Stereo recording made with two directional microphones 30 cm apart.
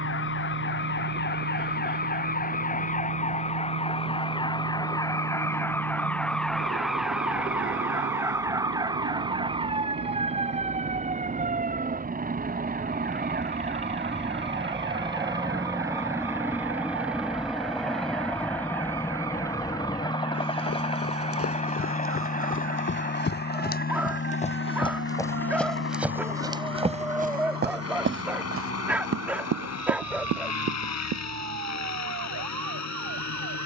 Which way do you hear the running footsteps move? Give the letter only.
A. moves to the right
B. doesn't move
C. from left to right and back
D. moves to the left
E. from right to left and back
A.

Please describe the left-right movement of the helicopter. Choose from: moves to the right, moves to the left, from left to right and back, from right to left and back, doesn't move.
moves to the left.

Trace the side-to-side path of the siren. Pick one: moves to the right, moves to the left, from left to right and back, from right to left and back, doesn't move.
moves to the right.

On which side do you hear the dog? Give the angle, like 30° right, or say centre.
centre.